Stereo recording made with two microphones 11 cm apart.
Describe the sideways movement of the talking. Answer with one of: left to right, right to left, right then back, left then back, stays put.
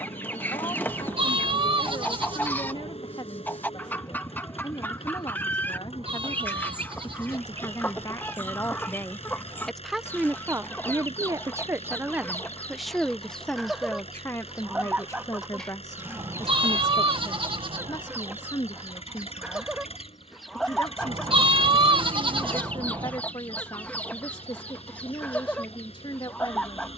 right then back.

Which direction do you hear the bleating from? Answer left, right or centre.
right.